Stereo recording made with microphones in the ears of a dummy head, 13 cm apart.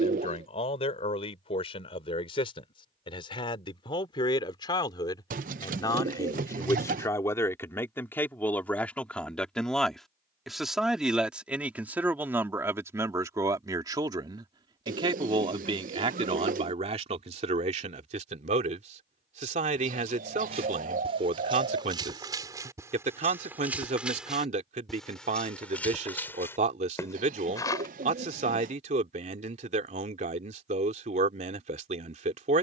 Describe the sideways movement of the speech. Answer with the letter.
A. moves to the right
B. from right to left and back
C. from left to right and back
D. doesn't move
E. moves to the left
A.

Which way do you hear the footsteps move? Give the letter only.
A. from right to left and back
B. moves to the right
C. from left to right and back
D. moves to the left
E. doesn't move
D.